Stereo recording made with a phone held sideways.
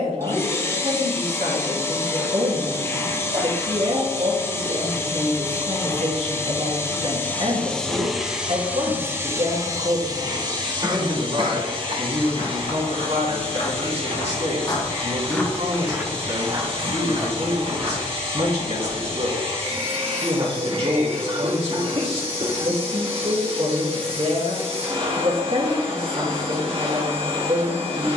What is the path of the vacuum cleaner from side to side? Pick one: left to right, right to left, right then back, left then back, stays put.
left to right.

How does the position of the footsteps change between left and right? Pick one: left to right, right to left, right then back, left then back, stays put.
left to right.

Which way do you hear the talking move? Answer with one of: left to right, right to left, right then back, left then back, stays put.
stays put.